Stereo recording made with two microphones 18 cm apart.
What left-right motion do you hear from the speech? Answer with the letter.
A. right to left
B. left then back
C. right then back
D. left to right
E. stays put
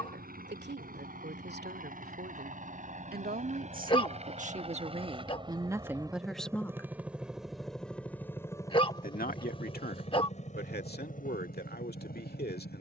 A.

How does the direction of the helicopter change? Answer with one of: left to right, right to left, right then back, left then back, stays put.
right to left.